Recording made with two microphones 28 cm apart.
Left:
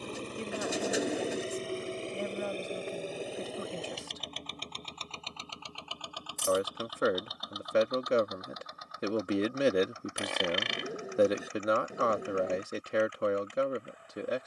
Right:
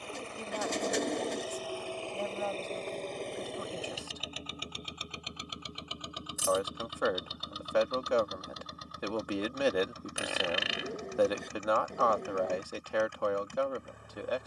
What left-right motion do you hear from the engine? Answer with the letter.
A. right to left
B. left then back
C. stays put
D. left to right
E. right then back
D.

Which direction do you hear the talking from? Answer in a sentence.
You can hear the talking on the left.